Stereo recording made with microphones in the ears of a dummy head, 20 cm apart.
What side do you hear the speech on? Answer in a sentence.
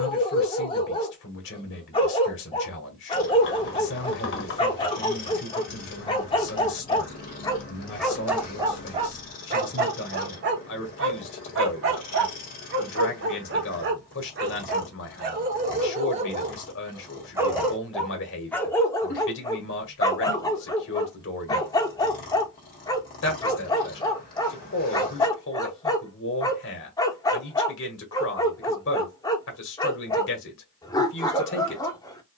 You can hear the speech on the left.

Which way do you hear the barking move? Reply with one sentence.
In this clip you hear the barking go right and come back.